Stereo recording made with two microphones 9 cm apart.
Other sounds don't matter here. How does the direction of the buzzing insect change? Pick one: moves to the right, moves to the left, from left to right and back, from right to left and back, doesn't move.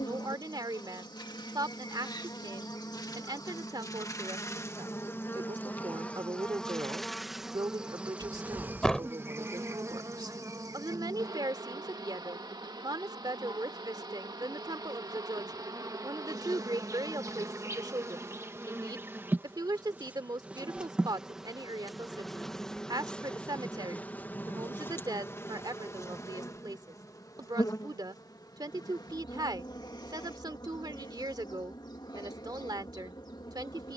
from left to right and back.